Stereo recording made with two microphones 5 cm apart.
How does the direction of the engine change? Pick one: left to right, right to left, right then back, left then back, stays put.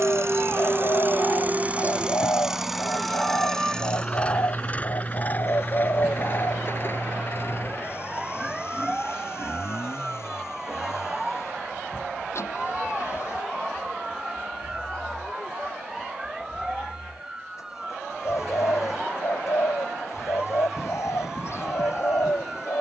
right to left.